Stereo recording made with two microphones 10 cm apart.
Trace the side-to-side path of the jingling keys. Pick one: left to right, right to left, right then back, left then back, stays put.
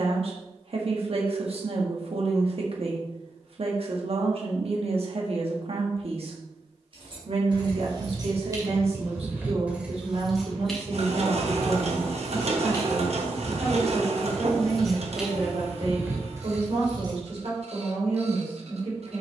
left then back.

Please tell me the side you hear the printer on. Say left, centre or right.
right.